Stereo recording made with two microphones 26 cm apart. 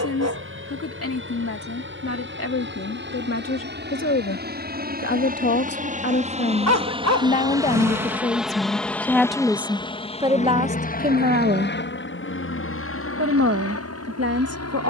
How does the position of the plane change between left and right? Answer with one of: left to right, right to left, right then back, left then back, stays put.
right to left.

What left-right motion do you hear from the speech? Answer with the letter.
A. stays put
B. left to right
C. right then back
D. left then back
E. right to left
B.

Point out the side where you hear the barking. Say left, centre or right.
right.